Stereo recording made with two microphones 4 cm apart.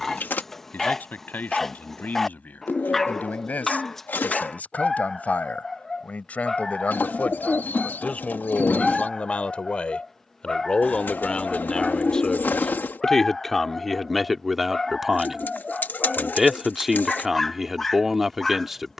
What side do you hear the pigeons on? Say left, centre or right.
left.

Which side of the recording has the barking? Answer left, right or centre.
centre.